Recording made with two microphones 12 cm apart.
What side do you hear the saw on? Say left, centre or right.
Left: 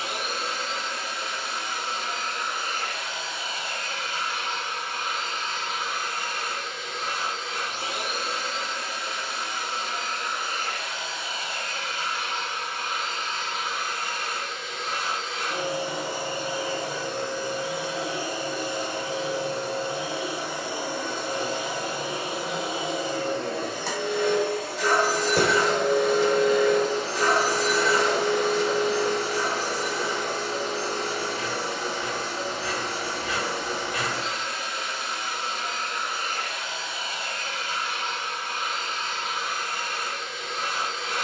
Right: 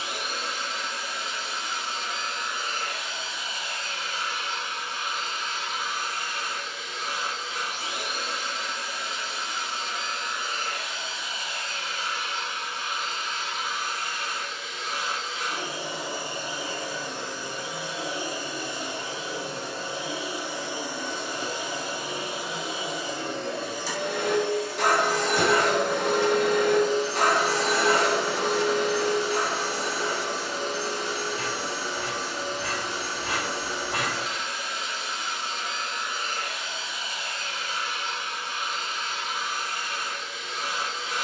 right.